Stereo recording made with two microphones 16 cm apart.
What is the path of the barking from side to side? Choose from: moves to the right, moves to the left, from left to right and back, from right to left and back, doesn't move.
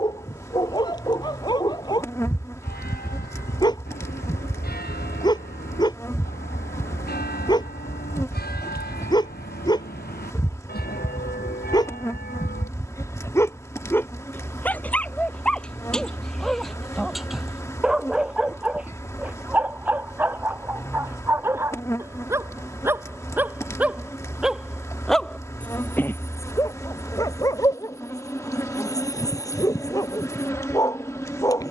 from left to right and back.